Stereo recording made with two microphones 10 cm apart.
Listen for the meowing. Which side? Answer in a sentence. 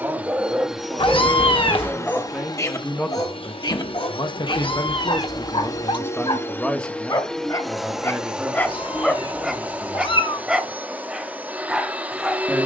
In this clip you hear the meowing on the left.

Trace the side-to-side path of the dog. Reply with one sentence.
You can hear the dog go left and come back.